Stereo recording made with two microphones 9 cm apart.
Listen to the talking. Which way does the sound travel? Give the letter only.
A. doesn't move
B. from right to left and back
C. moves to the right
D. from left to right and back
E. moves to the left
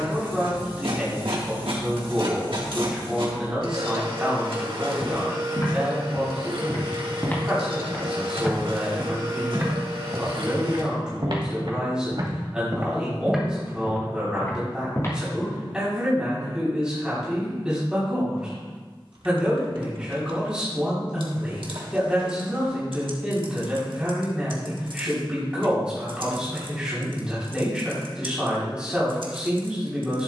A.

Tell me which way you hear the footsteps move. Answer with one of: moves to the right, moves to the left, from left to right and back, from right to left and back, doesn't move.
from left to right and back.